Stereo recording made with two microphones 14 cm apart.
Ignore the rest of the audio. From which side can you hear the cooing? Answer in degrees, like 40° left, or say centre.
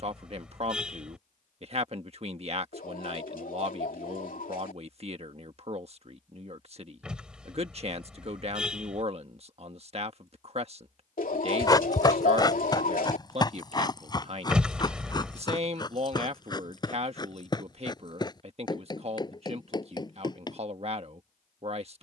80° left.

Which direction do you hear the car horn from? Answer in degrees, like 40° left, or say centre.
10° right.